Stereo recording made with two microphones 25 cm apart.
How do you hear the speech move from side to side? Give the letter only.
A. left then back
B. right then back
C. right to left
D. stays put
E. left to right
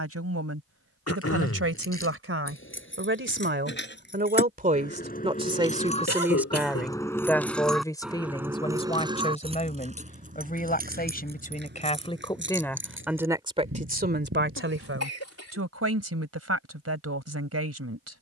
A.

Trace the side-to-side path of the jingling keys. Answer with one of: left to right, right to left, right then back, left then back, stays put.
left to right.